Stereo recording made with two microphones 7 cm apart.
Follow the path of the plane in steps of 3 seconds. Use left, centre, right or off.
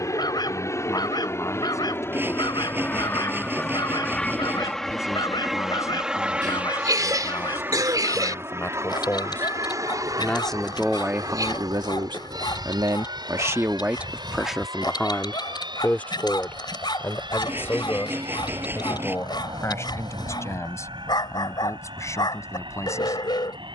left, centre, right, right, right, right, right, right.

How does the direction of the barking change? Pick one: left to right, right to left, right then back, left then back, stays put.
stays put.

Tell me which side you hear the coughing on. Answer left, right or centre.
right.